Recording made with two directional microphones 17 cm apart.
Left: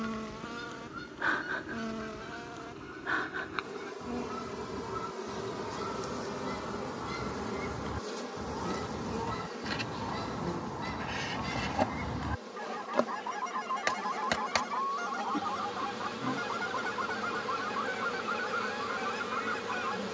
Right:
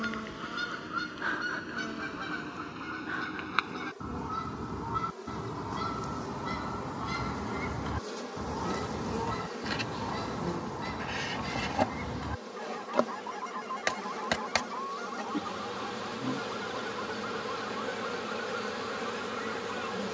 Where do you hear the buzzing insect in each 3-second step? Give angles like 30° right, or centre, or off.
20° left, 30° left, 10° left, 10° right, 10° right, 10° right, 10° right.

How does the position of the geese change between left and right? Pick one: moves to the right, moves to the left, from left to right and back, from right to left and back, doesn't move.
moves to the left.